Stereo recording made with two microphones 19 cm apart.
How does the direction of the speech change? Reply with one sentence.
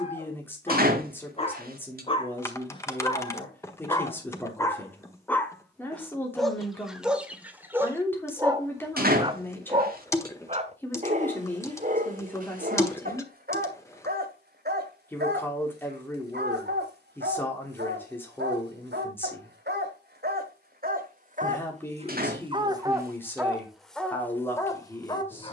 You can hear the speech stay in one place.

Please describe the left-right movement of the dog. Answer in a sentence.
In this clip you hear the dog go right and come back.